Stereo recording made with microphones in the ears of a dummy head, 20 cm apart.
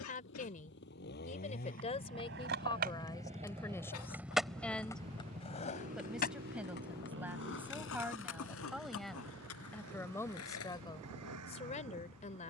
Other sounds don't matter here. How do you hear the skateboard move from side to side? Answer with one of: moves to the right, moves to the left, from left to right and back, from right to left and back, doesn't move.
moves to the left.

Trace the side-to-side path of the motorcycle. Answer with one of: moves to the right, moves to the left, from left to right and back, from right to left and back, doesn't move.
moves to the right.